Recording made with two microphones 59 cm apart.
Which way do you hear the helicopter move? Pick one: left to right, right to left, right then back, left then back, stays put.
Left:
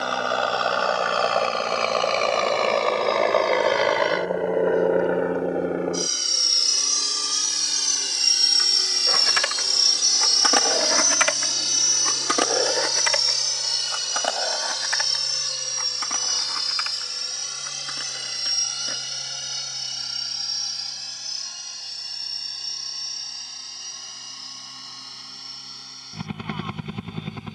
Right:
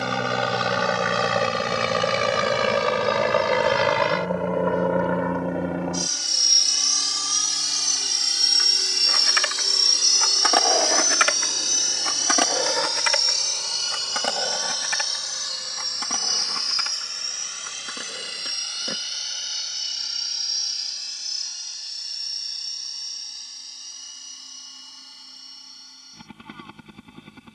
right to left.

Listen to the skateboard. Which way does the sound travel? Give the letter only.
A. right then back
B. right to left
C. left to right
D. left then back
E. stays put
C.